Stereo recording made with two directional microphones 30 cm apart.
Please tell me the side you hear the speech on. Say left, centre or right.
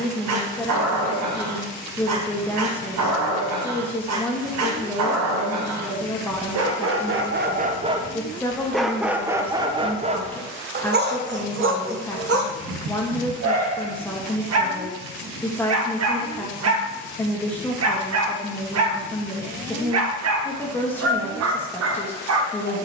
centre.